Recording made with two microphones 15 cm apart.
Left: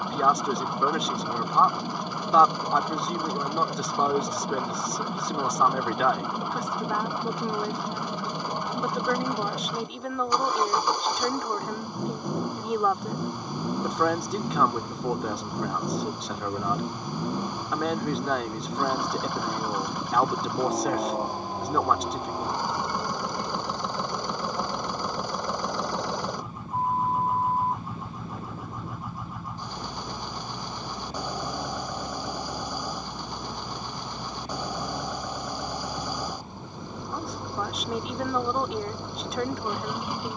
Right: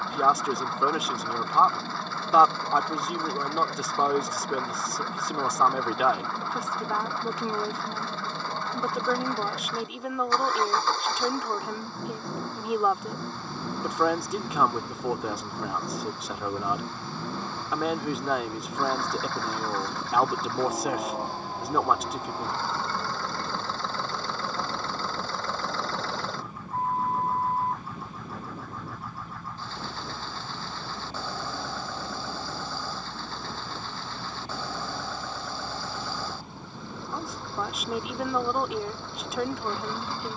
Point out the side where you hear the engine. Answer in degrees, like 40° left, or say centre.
20° left.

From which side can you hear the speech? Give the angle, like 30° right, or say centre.
centre.